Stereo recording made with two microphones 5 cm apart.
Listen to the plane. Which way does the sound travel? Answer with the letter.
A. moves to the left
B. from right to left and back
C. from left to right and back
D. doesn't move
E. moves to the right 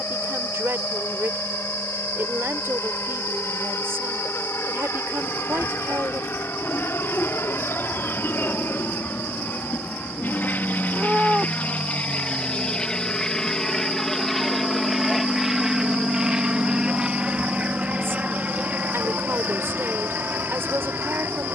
E.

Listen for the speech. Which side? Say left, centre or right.
right.